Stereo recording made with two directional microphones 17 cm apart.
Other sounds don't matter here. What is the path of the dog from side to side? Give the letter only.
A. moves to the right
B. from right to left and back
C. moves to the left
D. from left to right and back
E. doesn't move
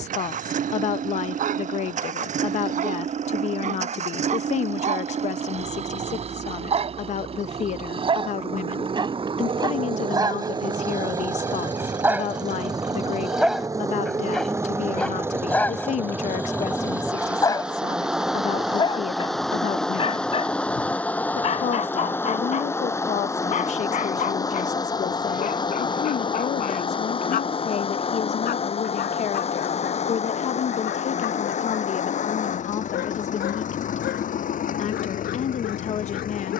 C.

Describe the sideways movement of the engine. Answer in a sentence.
In this clip you hear the engine go from the right side to the left.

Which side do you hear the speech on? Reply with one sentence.
You can hear the speech on the left.